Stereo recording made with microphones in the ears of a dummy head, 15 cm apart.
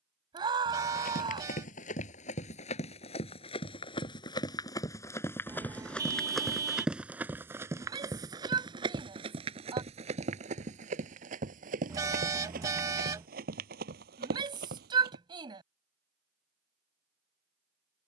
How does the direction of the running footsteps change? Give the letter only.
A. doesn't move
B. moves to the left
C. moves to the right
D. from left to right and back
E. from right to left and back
C.